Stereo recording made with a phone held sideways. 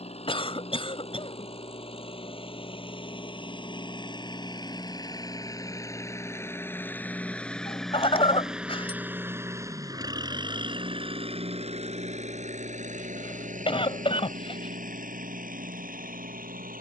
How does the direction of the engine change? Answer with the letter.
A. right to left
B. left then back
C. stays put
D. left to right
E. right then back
D.